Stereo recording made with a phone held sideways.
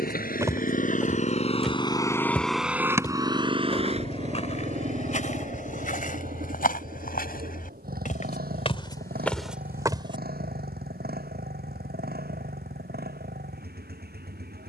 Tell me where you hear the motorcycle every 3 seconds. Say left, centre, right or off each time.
left, right, right, right, right.